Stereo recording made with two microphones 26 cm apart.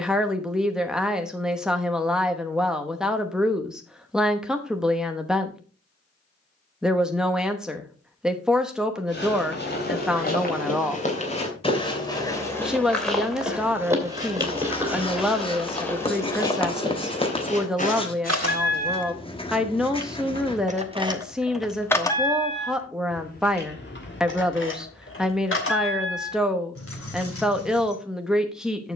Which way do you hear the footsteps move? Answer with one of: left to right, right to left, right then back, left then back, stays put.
right then back.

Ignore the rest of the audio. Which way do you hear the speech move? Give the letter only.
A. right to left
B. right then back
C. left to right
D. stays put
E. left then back
D.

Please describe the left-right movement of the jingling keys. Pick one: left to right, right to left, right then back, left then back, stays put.
right to left.